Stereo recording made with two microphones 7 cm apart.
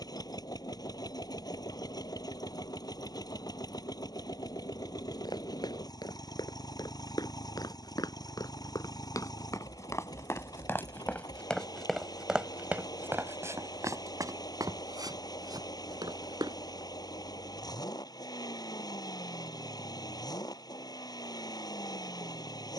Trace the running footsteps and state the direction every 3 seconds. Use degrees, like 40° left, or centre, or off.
off, 70° left, 60° left, 30° left, 40° right, 70° right, off, off.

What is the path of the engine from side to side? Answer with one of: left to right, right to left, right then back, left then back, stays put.
stays put.